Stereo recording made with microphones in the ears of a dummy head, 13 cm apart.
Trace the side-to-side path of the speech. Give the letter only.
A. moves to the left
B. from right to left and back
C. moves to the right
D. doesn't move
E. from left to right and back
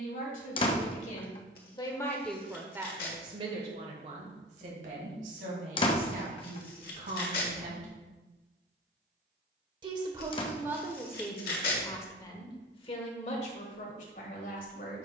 E.